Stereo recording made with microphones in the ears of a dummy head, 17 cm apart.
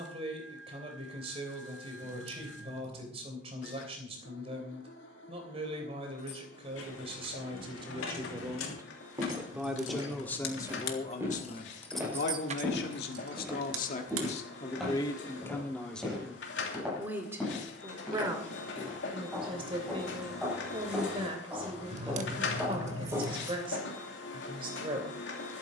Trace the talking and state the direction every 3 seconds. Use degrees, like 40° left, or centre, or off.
30° right, 30° right, 30° right, 20° left, 50° left, centre, 30° right, 30° right, 30° right.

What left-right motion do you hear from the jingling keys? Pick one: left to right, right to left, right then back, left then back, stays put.
left to right.